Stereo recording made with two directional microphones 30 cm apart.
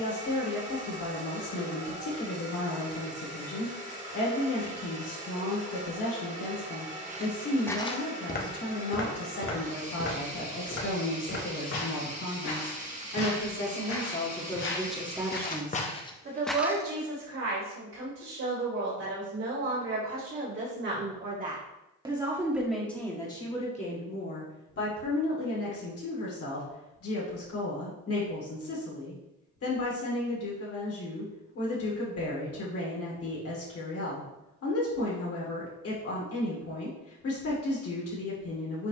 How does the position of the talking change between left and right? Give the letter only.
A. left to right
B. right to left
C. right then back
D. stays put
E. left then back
C.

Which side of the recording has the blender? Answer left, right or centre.
right.